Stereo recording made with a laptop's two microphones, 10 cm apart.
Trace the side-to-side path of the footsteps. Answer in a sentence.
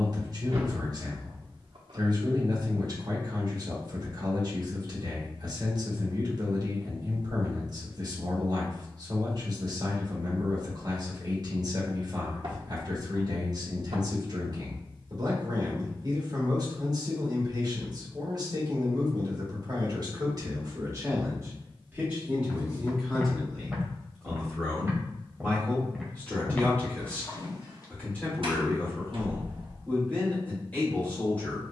In this clip you hear the footsteps move from left to right and back again.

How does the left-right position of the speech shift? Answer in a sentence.
In this clip you hear the speech travel towards the left.